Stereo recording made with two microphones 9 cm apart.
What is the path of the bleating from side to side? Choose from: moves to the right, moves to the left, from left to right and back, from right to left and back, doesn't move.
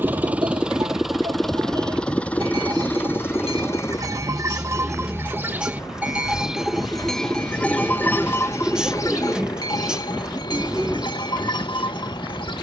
moves to the left.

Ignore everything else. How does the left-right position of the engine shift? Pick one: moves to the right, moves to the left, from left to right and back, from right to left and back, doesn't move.
moves to the left.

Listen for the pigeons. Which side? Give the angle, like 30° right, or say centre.
10° right.